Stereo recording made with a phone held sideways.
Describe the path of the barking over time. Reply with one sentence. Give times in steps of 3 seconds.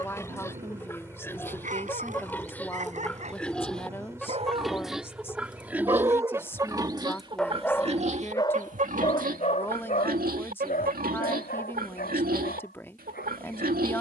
You can hear the barking on the right from 0 s, in the centre from 6 s and on the left from 9 s.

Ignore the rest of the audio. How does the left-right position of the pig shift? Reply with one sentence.
You can hear the pig go from the left side to the right.